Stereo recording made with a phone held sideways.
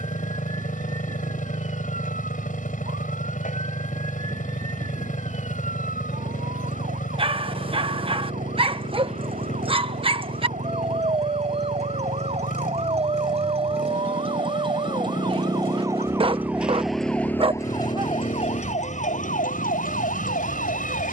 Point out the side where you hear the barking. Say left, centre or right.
right.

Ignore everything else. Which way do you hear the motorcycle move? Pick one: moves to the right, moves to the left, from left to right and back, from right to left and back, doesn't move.
doesn't move.